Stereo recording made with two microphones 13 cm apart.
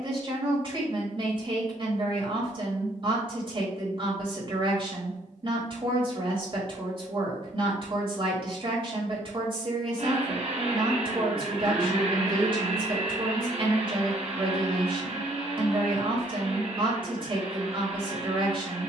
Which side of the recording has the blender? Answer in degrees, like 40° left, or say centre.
60° right.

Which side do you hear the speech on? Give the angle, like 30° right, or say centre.
40° right.